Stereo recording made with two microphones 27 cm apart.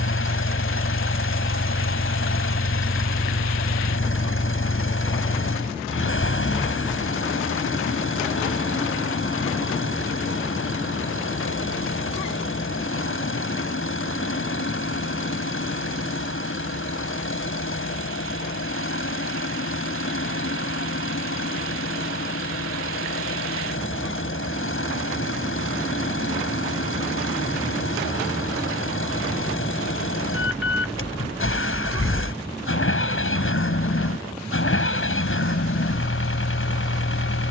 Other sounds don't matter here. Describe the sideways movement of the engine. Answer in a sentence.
You can hear the engine stay put.